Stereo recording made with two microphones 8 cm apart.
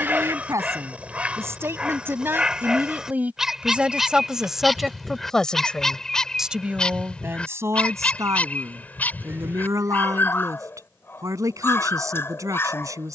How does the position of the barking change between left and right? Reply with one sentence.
In this clip you hear the barking go from the right side to the left.